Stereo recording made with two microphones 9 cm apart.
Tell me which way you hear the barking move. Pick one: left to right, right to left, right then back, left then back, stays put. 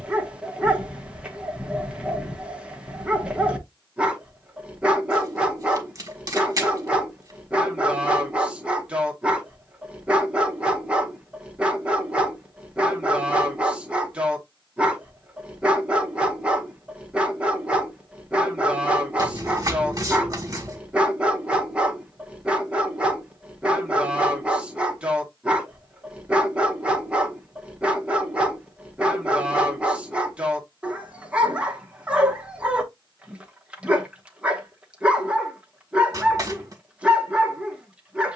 stays put.